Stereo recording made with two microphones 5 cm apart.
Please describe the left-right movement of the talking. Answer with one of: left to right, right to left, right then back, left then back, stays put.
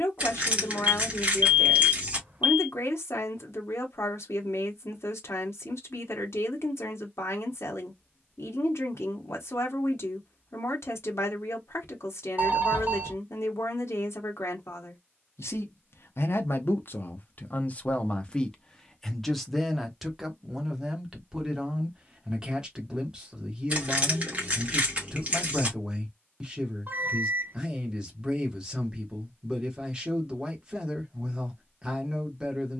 left to right.